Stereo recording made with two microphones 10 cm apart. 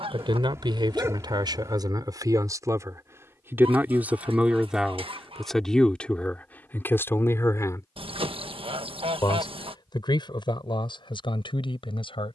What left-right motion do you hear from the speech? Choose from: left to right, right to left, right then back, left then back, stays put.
right to left.